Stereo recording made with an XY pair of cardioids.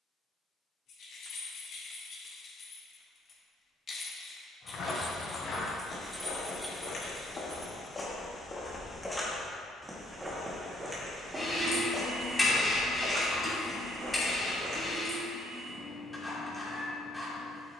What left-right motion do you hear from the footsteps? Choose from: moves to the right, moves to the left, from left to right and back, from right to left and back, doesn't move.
moves to the right.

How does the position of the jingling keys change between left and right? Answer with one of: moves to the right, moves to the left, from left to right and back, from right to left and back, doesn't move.
moves to the right.